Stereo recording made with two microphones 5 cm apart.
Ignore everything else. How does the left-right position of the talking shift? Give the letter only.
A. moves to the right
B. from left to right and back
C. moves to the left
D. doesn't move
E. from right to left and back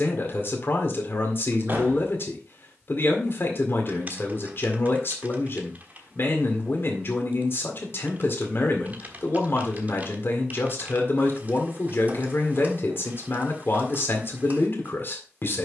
D.